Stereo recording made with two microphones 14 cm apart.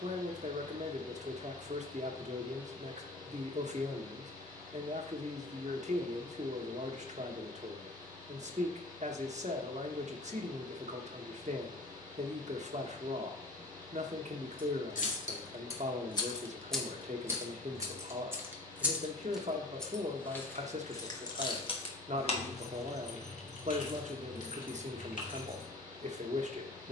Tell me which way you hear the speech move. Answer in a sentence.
In this clip you hear the speech stay put.